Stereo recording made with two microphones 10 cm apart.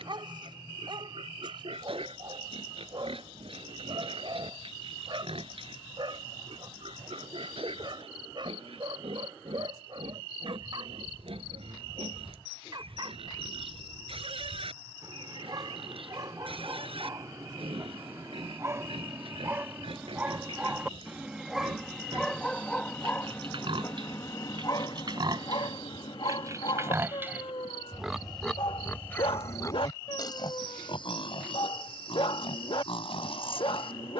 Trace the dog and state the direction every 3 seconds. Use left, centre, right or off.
right, right, right, right, right, right, right, centre, left, left, left, left.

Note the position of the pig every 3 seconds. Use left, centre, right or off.
right, right, right, right, right, right, right, right, right, centre, left, left.